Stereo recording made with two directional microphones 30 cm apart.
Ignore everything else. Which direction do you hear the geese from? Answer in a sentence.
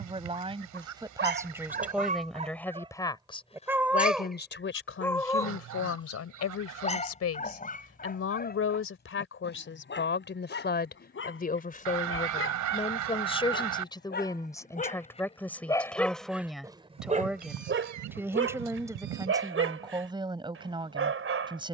In this clip you hear the geese on the right.